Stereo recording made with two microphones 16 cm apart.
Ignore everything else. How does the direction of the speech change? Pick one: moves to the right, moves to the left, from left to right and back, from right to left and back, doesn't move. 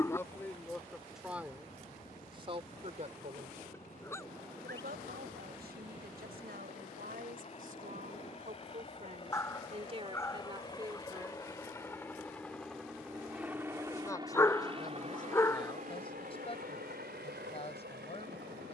from left to right and back.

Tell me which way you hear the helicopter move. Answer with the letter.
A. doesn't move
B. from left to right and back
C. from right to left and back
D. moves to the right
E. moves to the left
D.